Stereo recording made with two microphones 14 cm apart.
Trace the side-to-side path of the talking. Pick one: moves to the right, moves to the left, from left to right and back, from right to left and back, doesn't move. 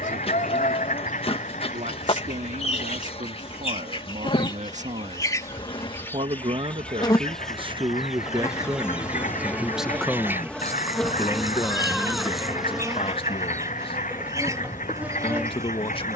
moves to the left.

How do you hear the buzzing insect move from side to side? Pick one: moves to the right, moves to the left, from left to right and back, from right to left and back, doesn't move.
moves to the right.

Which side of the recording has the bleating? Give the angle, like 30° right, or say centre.
centre.